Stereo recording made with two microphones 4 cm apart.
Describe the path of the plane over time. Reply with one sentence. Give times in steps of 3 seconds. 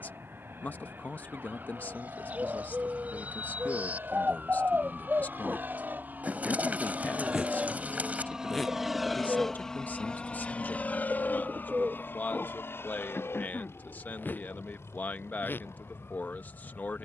In this clip you hear the plane on the right from 0 s and on the left from 9 s.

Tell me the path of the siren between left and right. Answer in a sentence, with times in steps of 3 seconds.
You can hear the siren on the right from 0 s, in the centre from 6 s and on the left from 9 s.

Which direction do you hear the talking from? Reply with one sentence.
In this clip you hear the talking on the left.